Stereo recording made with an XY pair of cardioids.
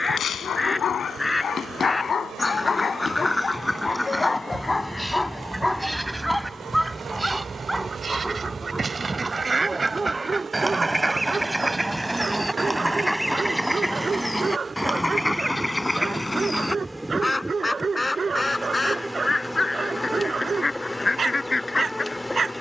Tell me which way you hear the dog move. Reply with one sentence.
You can hear the dog move to the right.